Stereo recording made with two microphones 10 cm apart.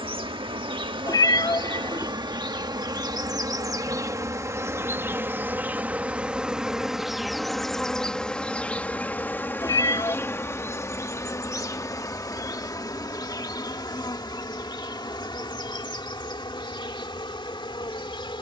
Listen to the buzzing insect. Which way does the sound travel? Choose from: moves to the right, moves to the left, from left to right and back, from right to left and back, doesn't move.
moves to the left.